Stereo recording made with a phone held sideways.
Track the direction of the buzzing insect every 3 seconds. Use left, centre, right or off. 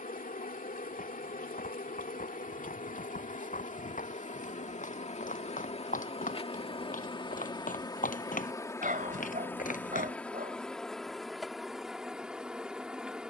left, left, left, centre, centre.